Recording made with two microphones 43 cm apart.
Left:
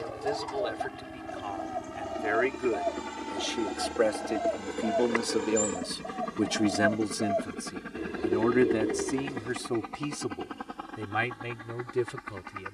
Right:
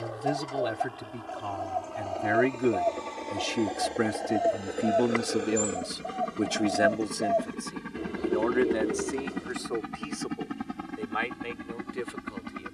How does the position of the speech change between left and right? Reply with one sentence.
You can hear the speech move to the left.